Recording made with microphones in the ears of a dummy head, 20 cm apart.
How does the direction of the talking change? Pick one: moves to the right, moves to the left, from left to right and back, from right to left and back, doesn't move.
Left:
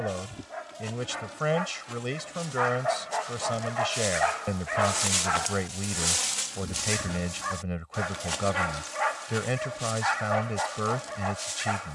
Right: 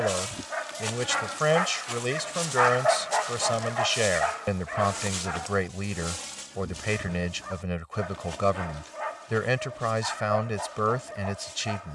doesn't move.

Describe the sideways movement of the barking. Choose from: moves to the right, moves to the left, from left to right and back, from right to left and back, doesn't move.
moves to the left.